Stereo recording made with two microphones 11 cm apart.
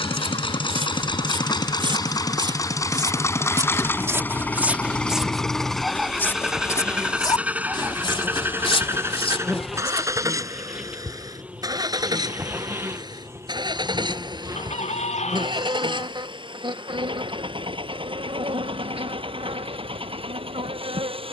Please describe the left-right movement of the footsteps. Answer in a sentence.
You can hear the footsteps go from the right side to the left.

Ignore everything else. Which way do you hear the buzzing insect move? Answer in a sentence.
You can hear the buzzing insect move from left to right.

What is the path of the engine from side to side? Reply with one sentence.
You can hear the engine travel towards the right.